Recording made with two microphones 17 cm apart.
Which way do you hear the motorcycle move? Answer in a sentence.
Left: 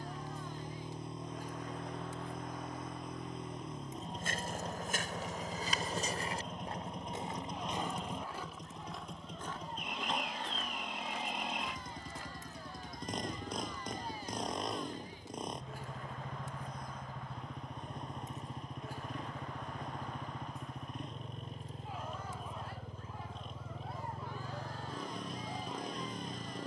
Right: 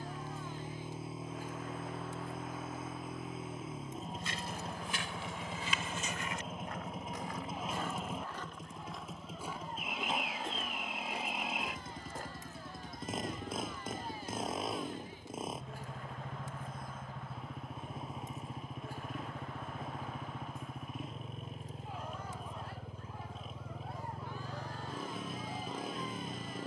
In this clip you hear the motorcycle stay in one place.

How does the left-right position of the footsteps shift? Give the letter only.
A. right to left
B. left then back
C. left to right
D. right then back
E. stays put
C.